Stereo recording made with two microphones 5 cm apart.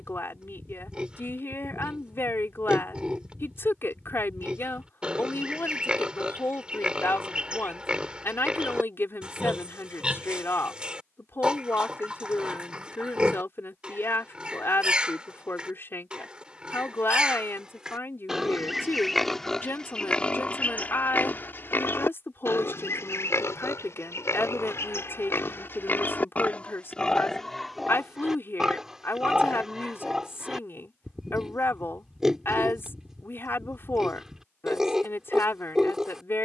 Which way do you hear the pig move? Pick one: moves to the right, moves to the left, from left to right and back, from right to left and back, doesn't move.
from right to left and back.